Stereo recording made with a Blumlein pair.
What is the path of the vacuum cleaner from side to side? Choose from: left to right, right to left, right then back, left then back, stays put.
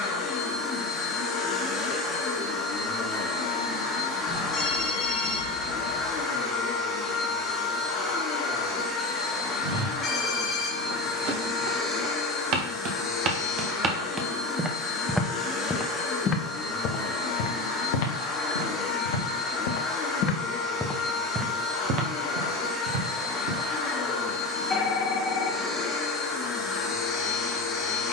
stays put.